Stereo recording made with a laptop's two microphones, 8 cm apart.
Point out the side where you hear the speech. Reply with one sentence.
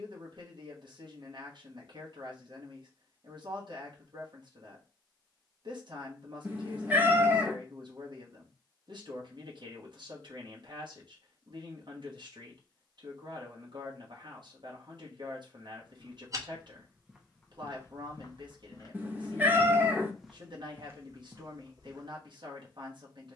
In this clip you hear the speech on the right.